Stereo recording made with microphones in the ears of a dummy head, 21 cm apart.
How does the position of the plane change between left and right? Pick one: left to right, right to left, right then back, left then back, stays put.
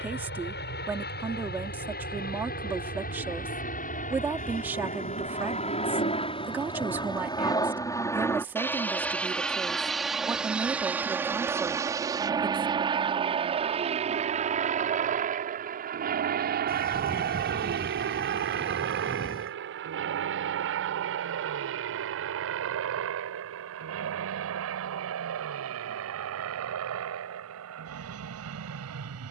left to right.